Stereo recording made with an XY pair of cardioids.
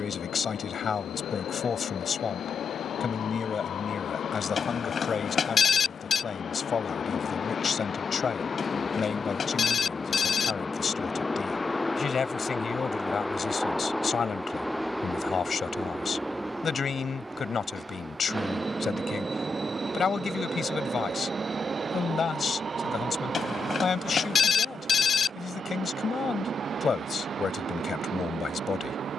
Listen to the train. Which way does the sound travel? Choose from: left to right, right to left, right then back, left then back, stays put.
left to right.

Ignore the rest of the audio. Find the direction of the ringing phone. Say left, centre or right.
left.